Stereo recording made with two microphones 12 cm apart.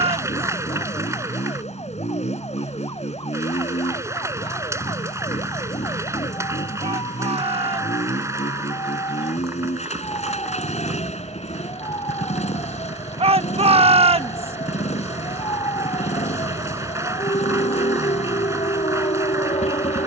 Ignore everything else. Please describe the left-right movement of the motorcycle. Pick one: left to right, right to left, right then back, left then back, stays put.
stays put.